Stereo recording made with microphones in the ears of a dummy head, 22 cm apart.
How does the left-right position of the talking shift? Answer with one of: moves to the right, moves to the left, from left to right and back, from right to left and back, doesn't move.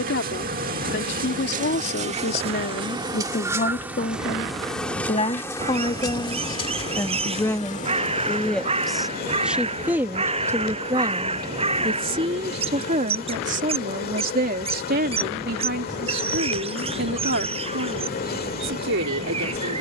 moves to the right.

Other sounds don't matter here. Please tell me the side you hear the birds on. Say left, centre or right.
right.